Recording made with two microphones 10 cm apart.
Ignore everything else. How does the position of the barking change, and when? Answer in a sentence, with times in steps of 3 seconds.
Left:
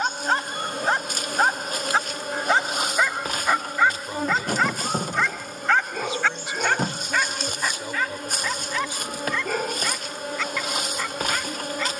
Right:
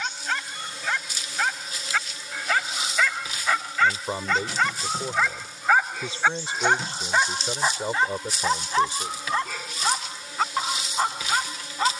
In this clip you hear the barking on the left from 0 s, in the centre from 3 s and on the right from 6 s.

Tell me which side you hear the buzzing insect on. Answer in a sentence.
In this clip you hear the buzzing insect on the left.